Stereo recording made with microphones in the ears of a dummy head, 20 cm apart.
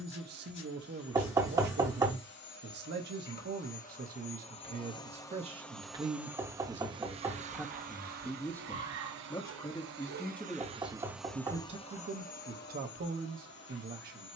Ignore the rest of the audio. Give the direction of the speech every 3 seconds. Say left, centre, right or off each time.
right, right, centre, centre, right.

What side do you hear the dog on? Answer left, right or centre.
right.